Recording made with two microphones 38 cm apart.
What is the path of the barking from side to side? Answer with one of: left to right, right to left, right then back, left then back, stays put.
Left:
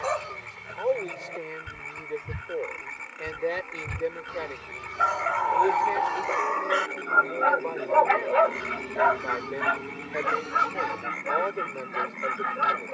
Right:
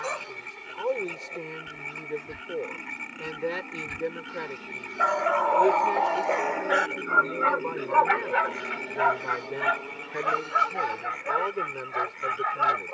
left to right.